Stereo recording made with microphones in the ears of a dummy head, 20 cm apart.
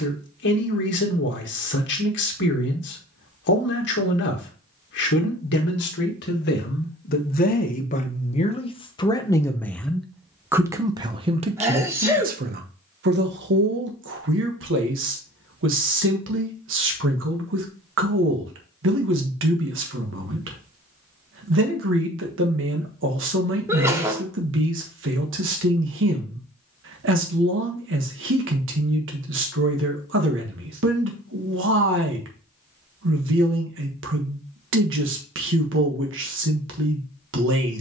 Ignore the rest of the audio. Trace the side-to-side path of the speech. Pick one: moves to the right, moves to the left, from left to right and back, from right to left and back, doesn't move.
moves to the right.